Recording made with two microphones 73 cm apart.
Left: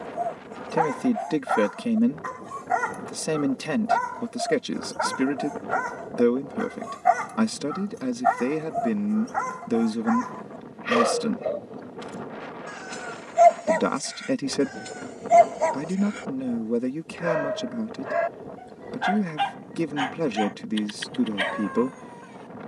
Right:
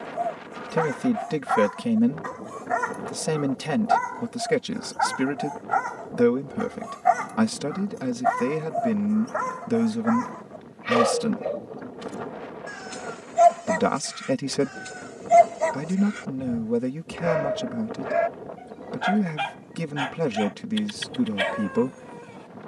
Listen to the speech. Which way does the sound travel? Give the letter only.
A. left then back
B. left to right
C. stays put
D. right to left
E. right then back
C.